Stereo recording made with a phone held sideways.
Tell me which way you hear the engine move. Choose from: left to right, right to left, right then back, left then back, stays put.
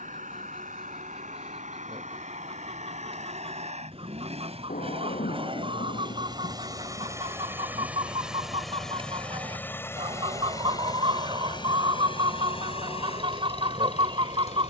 right to left.